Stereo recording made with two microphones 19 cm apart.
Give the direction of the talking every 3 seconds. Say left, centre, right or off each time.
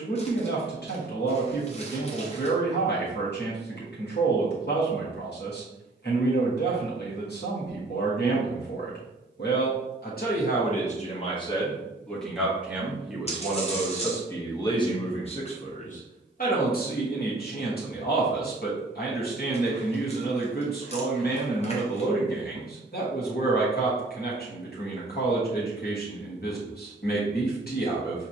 left, left, left, left, centre, left, left, left, left, left.